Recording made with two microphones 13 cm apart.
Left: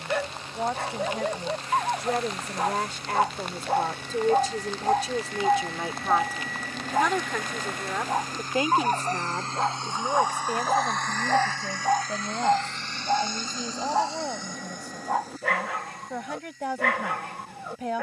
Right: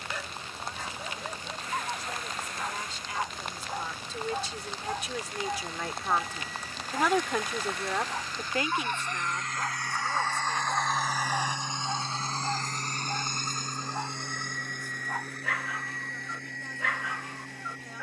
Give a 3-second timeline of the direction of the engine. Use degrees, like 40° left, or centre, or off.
70° left, 70° left, 50° left, 10° left, 50° right, 70° right.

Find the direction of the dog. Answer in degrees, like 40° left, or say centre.
60° left.